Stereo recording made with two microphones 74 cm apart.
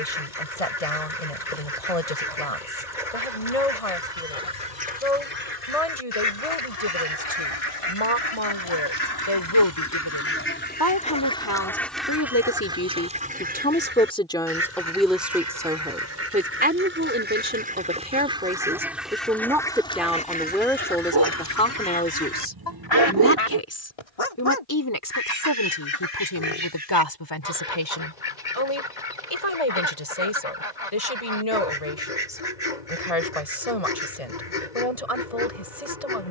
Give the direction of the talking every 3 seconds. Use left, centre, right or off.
left, left, left, left, centre, centre, centre, centre, left, left, left, left.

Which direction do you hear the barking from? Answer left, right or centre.
right.